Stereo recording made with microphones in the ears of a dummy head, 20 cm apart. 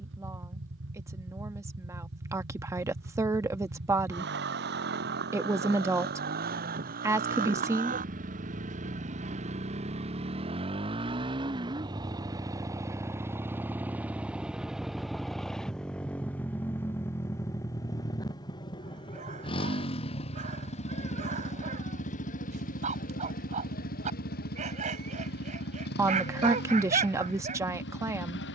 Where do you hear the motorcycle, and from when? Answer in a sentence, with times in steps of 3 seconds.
You can hear the motorcycle on the right from 0 s, in the centre from 12 s and on the left from 18 s.